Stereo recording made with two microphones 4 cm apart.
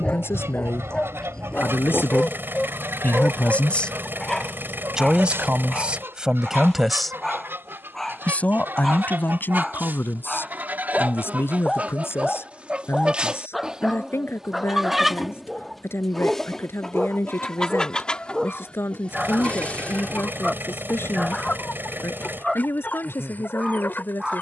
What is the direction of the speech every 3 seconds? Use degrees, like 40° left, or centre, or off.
70° left, 10° left, 20° left, 60° left, 70° left, 70° left, 70° left, 70° left.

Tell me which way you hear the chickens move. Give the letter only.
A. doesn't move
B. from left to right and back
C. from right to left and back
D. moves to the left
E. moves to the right
D.